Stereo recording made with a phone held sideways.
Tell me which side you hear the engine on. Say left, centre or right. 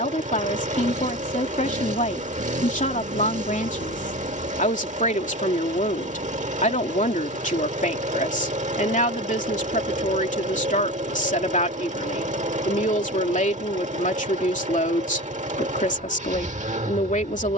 right.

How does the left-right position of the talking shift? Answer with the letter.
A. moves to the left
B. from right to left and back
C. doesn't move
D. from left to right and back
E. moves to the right
C.